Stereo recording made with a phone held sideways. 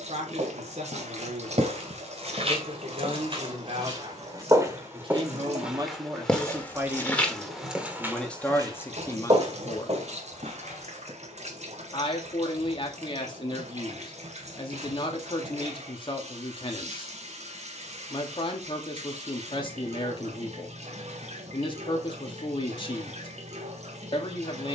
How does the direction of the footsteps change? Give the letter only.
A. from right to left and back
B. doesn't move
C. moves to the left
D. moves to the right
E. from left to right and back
A.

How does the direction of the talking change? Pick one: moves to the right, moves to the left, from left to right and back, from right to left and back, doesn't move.
moves to the left.